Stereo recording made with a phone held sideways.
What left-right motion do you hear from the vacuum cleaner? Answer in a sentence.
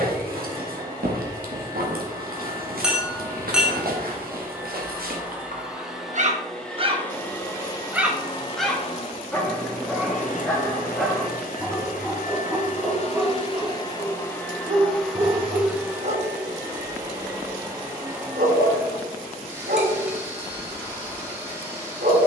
You can hear the vacuum cleaner go left and come back.